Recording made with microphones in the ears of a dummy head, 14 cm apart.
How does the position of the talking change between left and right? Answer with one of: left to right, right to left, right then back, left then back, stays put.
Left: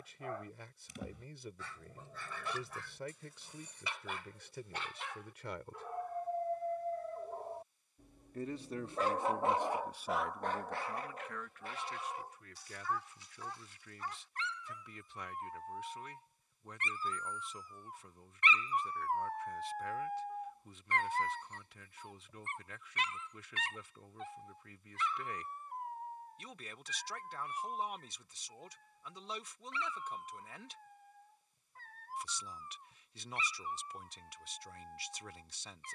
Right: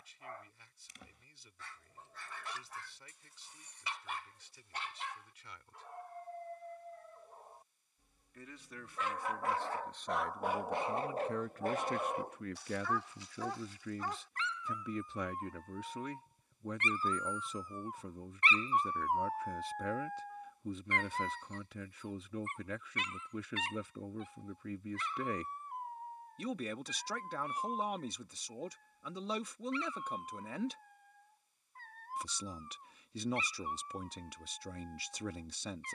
left to right.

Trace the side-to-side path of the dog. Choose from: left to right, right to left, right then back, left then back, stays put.
right then back.